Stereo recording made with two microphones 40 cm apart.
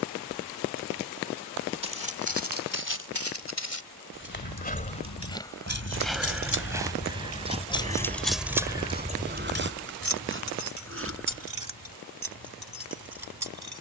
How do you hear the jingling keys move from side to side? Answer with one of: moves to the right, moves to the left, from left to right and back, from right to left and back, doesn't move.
moves to the right.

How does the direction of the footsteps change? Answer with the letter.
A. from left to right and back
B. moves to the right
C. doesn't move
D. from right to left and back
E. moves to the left
B.